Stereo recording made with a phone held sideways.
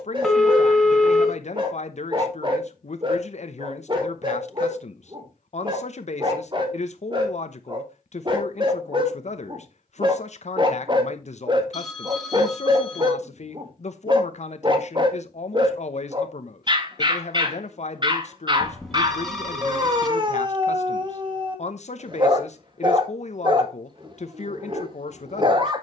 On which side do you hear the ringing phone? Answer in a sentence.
You can hear the ringing phone in the centre.